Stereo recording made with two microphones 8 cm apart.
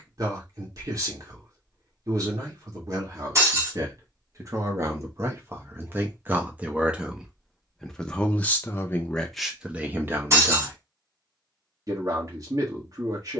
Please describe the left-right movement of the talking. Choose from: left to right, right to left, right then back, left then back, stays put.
left then back.